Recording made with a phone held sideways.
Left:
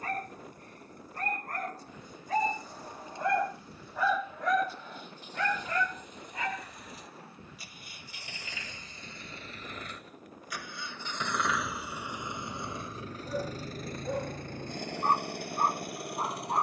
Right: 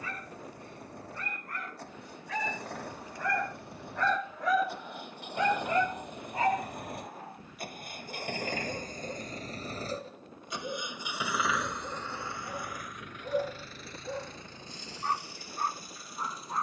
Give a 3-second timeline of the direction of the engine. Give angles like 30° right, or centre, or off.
70° right, 70° right, 60° right, 20° right, 40° left, 60° left.